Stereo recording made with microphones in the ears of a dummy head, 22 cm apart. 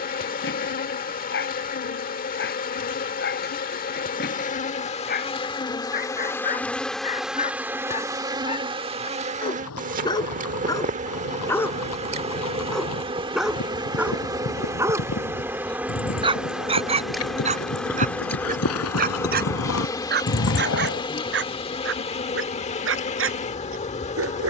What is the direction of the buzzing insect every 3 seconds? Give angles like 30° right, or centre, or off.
40° left, 30° left, 10° right, 30° right, 20° right, centre, 10° left, 30° left.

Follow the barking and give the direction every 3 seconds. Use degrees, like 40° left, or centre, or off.
50° left, 40° left, 30° left, 10° left, 10° right, 20° right, 40° right, 50° right.